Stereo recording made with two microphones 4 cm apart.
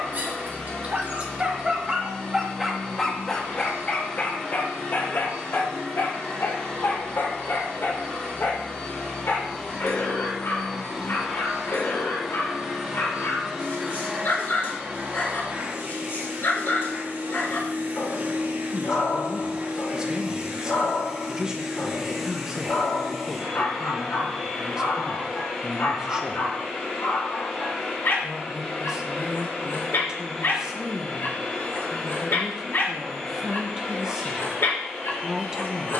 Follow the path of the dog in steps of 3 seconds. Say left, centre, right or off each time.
right, left, left, left, left, left, left, left, left, left, left, left.